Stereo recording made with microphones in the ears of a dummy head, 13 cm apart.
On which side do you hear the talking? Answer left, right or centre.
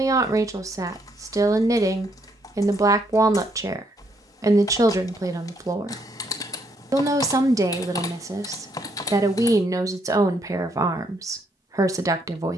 right.